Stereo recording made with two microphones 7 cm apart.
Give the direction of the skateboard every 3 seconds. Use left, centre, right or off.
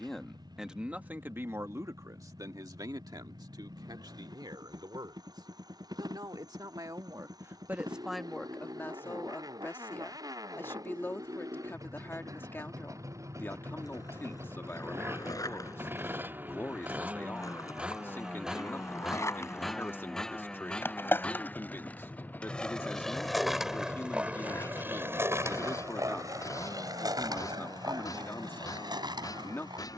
off, off, off, off, left, left, left, centre, right, right.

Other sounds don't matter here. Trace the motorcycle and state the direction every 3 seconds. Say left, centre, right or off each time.
right, right, right, right, right, right, centre, left, left, left.